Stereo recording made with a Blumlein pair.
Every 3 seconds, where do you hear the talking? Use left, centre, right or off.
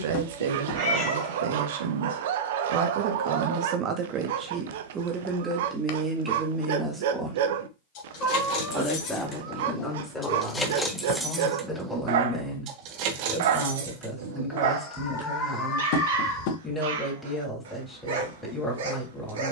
right, right, centre, centre, centre, centre, centre.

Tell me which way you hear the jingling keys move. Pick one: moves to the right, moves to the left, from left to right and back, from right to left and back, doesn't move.
moves to the right.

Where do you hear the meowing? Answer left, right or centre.
left.